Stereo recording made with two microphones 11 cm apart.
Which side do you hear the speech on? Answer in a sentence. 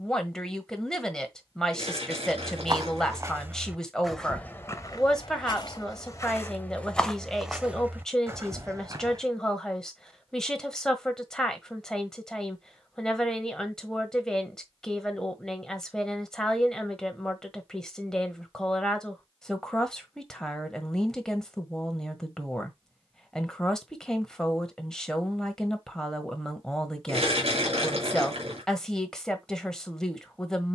You can hear the speech in the centre.